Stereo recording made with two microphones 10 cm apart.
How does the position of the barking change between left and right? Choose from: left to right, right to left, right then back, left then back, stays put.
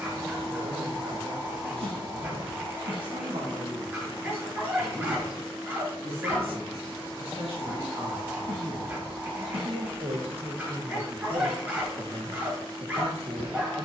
stays put.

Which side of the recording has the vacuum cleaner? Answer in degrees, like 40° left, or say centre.
40° right.